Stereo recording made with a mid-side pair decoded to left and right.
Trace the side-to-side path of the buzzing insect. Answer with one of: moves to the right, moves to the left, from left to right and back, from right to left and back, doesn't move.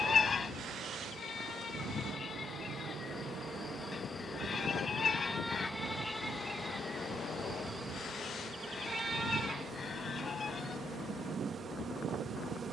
moves to the right.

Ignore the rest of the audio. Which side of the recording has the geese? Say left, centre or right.
left.